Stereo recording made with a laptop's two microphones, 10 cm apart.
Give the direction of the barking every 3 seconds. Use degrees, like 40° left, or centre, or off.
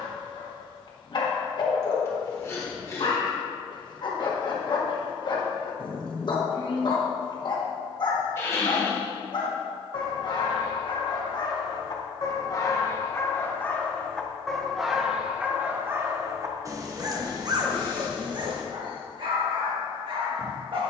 50° left, 50° left, 50° left, 50° left, 20° left, 30° right, 60° right.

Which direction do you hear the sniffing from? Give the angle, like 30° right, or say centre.
30° left.